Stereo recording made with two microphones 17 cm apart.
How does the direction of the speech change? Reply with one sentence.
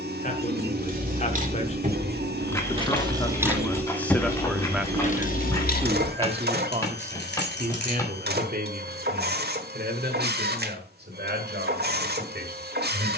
In this clip you hear the speech move to the right.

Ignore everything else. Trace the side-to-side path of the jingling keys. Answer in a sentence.
You can hear the jingling keys move from right to left.